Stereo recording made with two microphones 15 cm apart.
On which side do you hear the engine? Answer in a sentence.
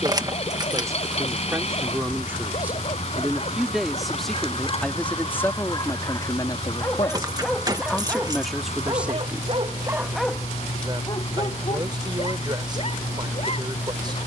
In this clip you hear the engine on the left.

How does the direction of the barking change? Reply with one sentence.
You can hear the barking move from left to right and back again.